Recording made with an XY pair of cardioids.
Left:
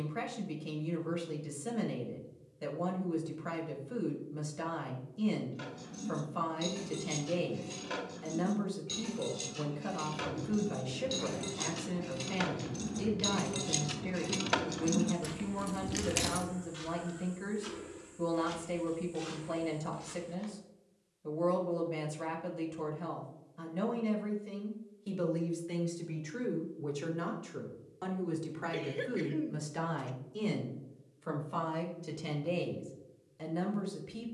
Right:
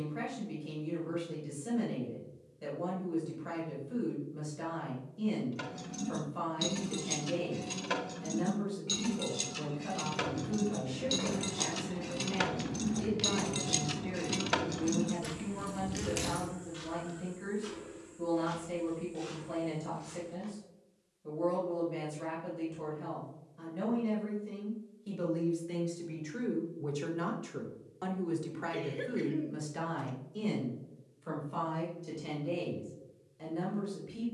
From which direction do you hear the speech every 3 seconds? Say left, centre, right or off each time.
left, left, left, left, left, left, left, left, left, centre, left, left.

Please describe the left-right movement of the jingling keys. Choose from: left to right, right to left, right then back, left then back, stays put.
right to left.